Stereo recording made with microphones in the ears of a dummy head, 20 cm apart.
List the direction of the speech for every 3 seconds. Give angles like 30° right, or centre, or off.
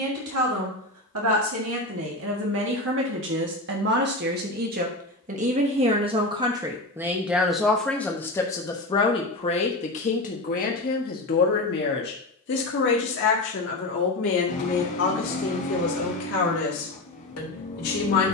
60° right, 40° right, centre, 40° left, 50° left, 60° left.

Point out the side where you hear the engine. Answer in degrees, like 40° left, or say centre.
40° left.